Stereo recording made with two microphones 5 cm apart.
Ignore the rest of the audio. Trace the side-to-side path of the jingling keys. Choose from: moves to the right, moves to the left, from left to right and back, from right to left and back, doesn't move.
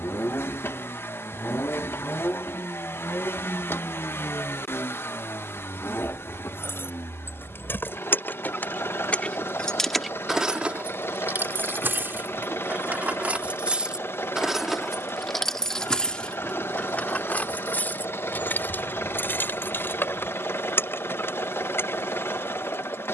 from left to right and back.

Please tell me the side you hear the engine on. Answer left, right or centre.
left.